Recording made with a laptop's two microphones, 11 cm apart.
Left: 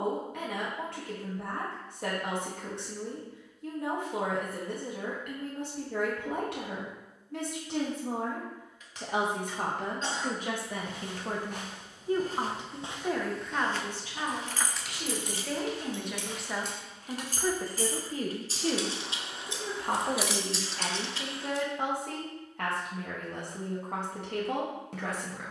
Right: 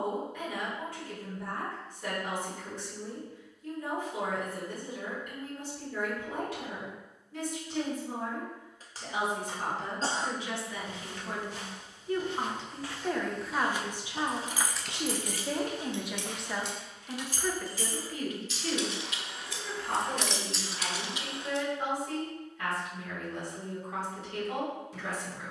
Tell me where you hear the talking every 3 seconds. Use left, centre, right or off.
left, left, left, left, centre, centre, left, left, left.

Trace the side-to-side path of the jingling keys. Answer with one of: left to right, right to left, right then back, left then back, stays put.
left then back.